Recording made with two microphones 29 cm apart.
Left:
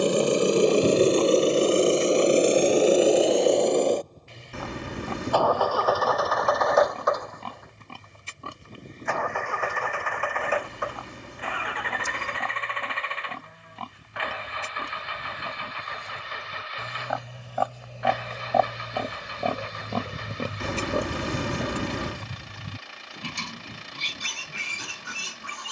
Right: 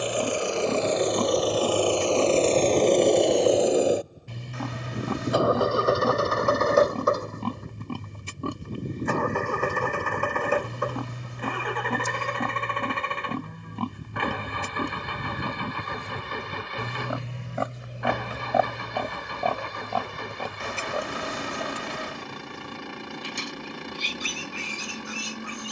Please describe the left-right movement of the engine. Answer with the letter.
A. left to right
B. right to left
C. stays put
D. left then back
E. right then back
A.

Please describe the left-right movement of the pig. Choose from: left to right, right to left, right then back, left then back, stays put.
right to left.